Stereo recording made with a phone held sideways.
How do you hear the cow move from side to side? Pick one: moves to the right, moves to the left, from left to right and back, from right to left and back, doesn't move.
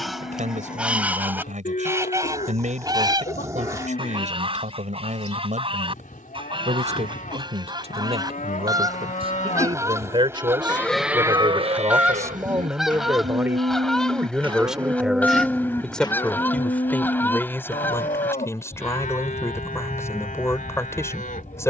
from left to right and back.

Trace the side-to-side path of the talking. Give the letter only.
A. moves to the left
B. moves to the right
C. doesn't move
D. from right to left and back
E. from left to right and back
A.